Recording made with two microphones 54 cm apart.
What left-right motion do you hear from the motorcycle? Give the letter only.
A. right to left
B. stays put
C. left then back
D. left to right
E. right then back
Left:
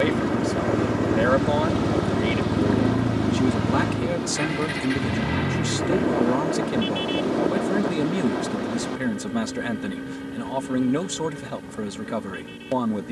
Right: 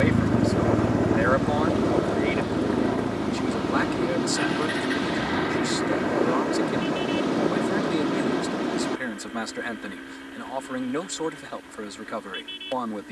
A.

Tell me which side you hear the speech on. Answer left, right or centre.
left.